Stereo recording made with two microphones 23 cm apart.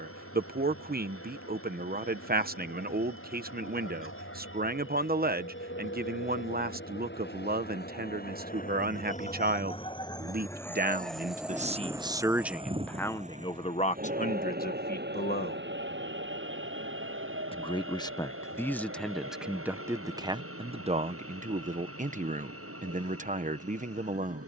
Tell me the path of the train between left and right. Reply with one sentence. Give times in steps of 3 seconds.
In this clip you hear the train on the left from 0 s, in the centre from 9 s and on the right from 12 s.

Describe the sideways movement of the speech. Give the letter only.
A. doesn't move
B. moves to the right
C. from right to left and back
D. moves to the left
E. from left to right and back
C.